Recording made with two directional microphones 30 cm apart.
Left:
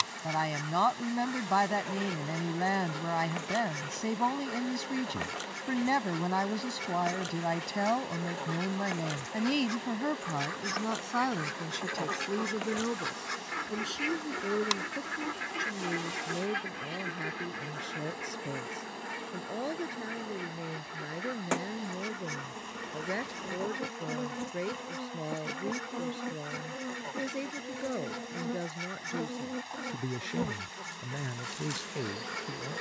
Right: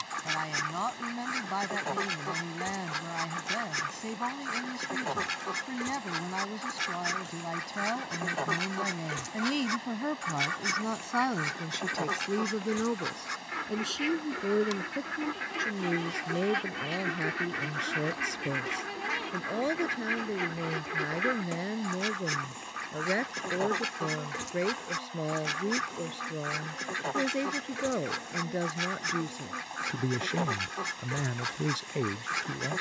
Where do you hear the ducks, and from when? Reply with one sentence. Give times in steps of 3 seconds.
In this clip you hear the ducks on the right from 0 s, in the centre from 12 s and on the right from 15 s.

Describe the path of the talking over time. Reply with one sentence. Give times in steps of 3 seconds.
In this clip you hear the talking on the left from 0 s, in the centre from 9 s and on the right from 12 s.